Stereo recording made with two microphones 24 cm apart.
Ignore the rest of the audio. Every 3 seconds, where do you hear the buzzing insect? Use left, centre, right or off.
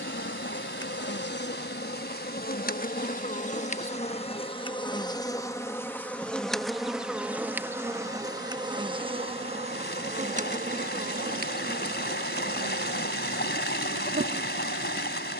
left, left, centre, right, right.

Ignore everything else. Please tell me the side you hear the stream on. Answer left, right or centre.
left.